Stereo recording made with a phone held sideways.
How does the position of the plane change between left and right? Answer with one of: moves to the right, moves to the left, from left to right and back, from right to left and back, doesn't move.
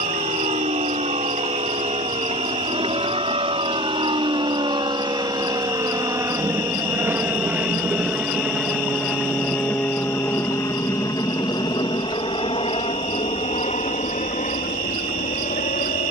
moves to the left.